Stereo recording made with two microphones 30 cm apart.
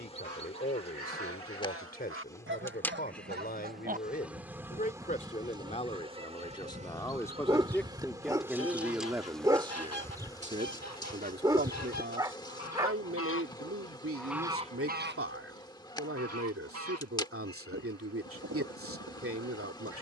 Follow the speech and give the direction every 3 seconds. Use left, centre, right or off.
left, left, centre, right, right, right, right.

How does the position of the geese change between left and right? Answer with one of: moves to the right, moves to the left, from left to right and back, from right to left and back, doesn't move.
from right to left and back.